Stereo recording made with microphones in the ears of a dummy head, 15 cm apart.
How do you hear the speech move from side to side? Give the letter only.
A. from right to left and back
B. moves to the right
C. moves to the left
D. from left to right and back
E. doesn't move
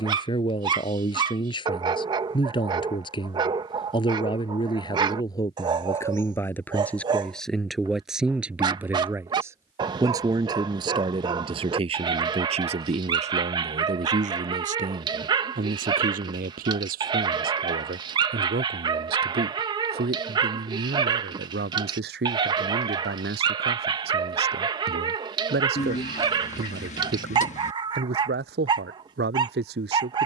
B.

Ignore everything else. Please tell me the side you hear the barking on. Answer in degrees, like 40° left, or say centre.
30° right.